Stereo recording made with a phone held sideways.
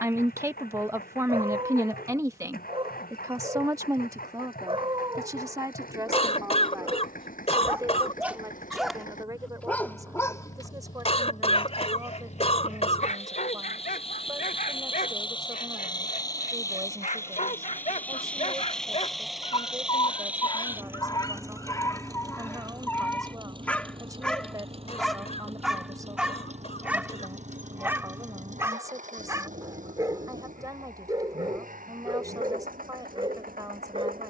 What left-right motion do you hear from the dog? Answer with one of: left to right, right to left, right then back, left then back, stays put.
left then back.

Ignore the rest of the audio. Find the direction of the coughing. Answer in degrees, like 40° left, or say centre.
40° left.